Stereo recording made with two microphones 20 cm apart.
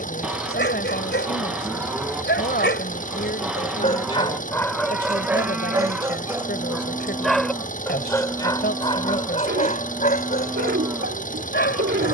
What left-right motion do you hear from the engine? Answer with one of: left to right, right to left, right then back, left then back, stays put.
stays put.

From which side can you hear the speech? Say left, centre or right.
left.